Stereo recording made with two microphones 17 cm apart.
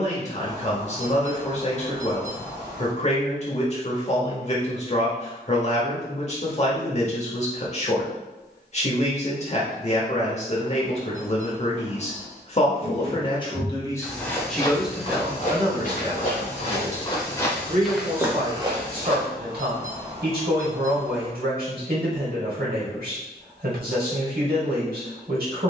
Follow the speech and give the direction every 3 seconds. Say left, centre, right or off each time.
left, left, left, left, left, right, right, right, right.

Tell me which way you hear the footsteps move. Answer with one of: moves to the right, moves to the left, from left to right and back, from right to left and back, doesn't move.
from right to left and back.